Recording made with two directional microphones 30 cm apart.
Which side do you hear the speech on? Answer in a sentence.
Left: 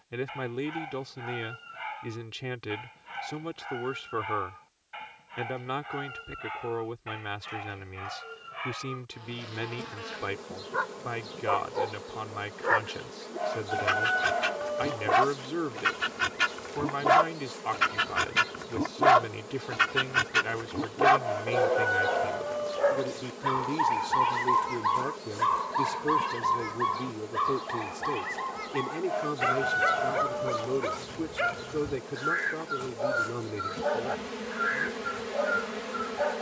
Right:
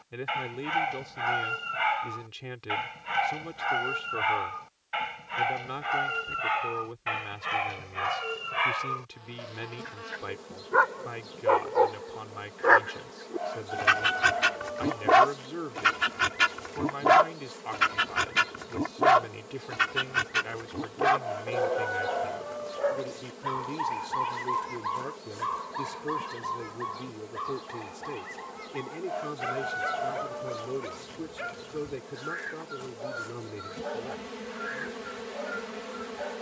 In this clip you hear the speech on the left.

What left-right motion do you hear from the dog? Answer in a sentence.
You can hear the dog travel towards the left.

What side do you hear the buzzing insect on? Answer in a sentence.
You can hear the buzzing insect on the left.